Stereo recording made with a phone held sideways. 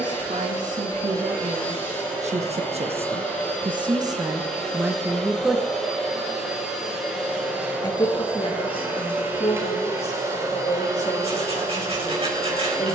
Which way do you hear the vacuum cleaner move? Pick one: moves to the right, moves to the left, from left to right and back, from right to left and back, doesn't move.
moves to the right.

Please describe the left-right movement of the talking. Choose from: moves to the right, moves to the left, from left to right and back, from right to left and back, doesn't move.
moves to the left.